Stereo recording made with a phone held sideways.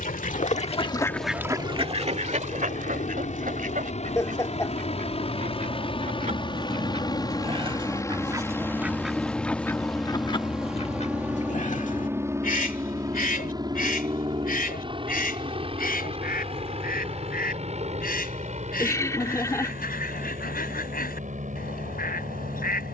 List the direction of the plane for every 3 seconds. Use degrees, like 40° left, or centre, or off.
60° left, 50° left, 20° left, centre, 20° right, 40° right, 50° right, 50° right.